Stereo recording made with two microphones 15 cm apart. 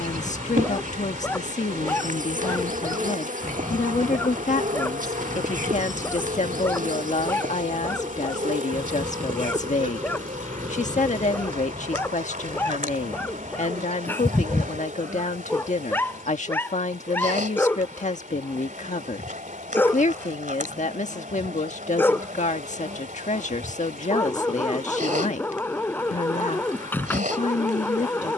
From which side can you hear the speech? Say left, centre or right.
left.